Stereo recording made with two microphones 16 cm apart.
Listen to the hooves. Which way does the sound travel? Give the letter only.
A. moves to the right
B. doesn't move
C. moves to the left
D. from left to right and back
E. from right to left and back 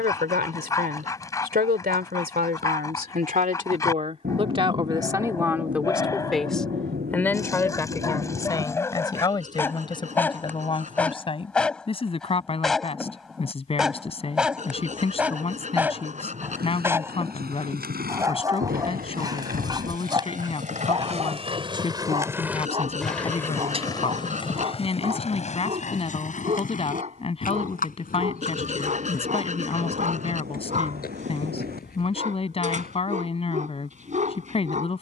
C.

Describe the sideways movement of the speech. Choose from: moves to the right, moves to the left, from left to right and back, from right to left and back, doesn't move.
moves to the left.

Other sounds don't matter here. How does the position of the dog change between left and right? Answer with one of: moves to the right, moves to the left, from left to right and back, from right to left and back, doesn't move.
moves to the right.